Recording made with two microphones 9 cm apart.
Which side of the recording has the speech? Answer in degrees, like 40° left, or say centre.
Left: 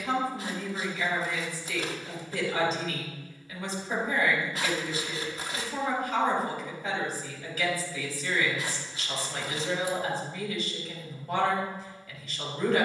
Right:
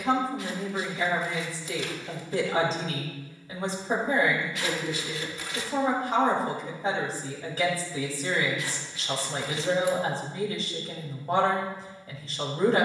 40° right.